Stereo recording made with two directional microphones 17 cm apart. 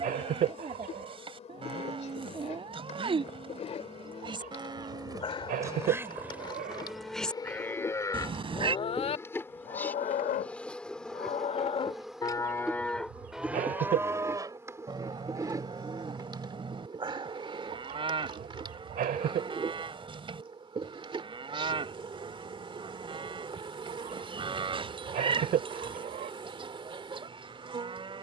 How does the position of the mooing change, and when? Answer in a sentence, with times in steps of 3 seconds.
You can hear the mooing on the right from 0 s, in the centre from 6 s, on the left from 9 s, in the centre from 12 s and on the right from 15 s.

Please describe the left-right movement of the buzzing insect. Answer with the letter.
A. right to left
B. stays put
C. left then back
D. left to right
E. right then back
D.